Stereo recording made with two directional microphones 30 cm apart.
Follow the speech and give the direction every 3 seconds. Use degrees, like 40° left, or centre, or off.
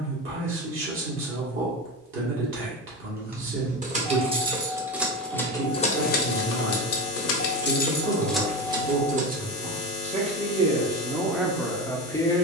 40° right, 40° right, 40° right, 10° right.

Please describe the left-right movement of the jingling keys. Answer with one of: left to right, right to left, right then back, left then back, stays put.
left then back.